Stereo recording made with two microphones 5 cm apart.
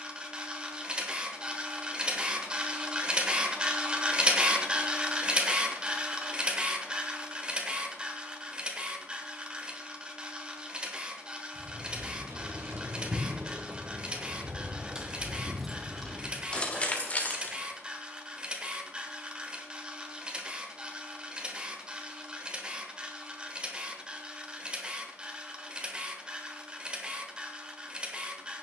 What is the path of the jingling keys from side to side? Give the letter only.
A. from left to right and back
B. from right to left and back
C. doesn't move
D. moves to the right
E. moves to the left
E.